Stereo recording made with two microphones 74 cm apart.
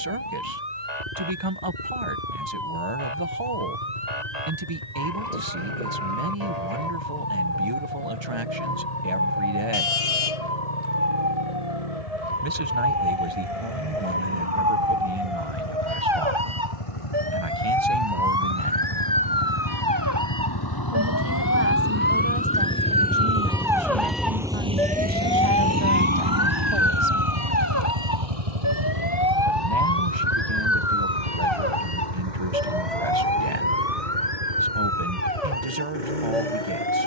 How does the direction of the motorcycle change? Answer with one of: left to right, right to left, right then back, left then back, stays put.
left to right.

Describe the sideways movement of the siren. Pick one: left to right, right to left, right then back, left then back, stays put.
right to left.